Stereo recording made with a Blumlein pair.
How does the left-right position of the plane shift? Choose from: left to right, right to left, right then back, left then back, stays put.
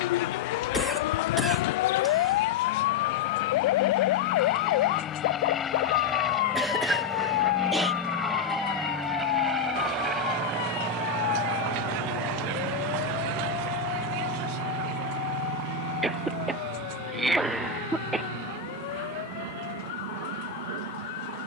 left to right.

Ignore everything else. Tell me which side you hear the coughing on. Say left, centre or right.
centre.